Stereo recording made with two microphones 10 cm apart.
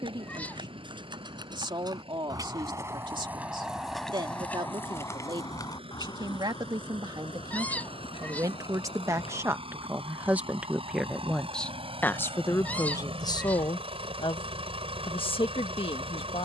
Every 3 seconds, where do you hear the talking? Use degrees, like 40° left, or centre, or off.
50° right, 50° right, 40° right, 10° right, 40° left, 70° left.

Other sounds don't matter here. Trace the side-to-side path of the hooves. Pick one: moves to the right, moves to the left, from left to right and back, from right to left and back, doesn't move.
moves to the left.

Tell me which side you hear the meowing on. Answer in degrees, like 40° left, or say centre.
20° left.